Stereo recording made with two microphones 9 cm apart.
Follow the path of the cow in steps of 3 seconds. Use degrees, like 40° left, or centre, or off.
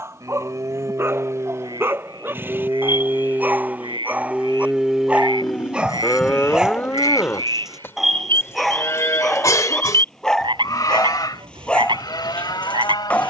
40° right, 10° right, 20° left, 50° left, 60° left.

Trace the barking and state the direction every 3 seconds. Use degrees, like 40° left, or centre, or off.
30° right, 20° right, centre, 10° left, 20° left.